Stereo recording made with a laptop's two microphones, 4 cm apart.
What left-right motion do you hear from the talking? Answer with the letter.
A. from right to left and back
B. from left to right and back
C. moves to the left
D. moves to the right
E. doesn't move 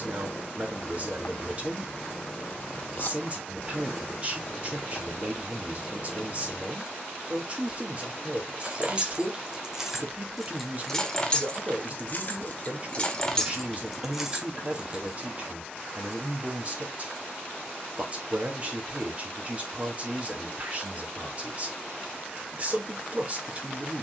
E.